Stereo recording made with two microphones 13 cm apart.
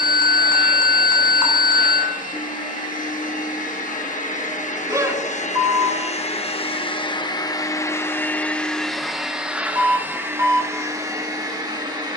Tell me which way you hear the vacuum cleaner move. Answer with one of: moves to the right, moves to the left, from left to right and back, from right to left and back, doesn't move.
moves to the right.